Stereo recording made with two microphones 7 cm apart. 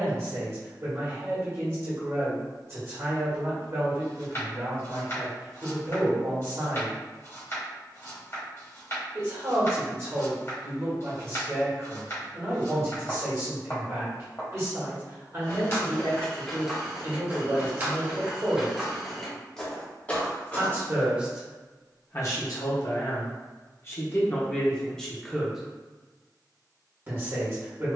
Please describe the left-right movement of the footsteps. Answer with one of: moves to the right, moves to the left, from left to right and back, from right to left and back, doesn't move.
from left to right and back.